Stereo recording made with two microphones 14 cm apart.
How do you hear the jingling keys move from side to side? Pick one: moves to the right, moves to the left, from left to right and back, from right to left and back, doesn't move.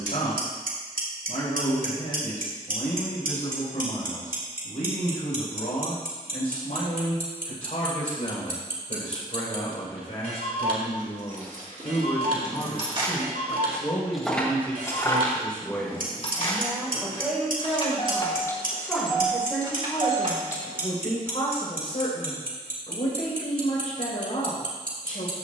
from right to left and back.